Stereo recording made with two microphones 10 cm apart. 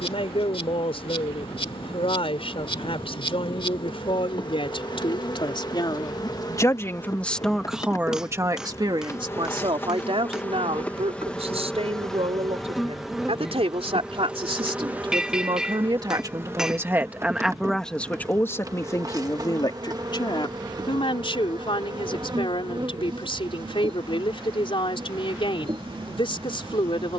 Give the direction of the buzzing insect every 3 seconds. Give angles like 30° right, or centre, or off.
60° left, 50° left, 30° left, 10° left, 10° right, 20° right, 40° right, 50° right, 50° right.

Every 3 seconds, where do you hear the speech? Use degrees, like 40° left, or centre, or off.
60° left, 60° left, centre, 70° right, 70° right, 30° right, 30° left, 50° left, 50° left.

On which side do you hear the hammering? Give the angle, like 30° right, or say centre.
10° right.